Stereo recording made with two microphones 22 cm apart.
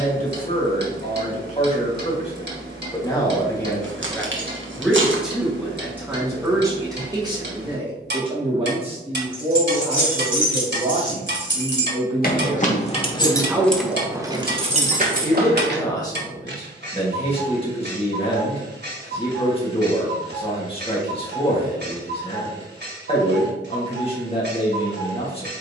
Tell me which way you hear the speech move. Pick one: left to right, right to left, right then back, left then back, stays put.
right then back.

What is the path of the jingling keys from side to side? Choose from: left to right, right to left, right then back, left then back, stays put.
left to right.